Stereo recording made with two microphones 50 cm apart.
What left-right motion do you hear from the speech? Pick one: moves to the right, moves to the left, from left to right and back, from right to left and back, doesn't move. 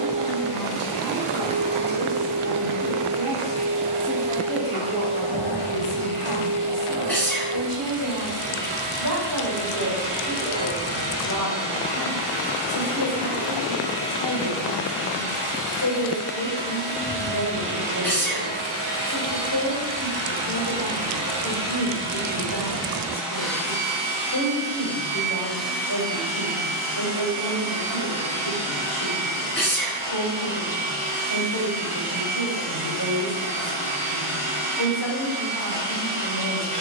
moves to the left.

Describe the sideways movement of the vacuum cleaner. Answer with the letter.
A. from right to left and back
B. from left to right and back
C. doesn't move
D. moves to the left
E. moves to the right
A.